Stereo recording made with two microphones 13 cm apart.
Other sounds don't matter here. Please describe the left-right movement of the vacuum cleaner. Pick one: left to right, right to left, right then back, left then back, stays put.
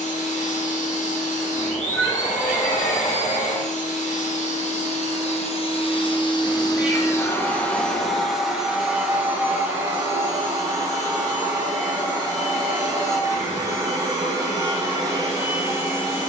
left to right.